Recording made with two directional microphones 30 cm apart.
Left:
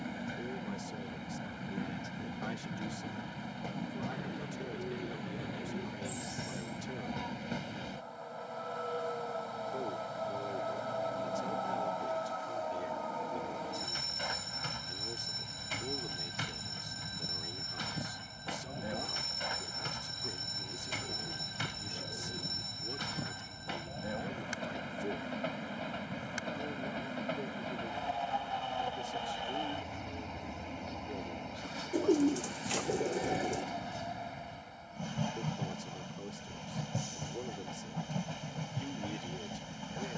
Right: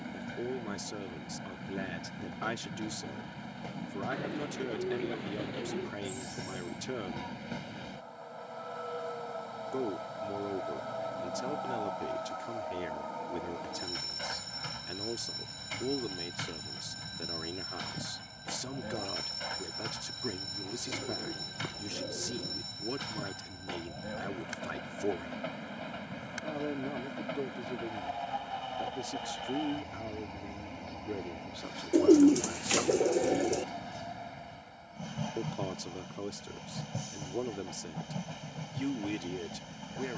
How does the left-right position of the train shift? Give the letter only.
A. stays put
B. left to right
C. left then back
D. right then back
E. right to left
A.